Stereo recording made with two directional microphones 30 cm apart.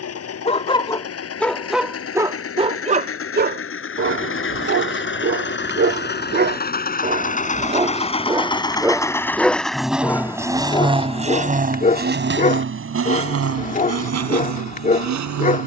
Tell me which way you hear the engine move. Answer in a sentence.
You can hear the engine go from the left side to the right.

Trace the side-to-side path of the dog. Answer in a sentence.
You can hear the dog move from left to right and back again.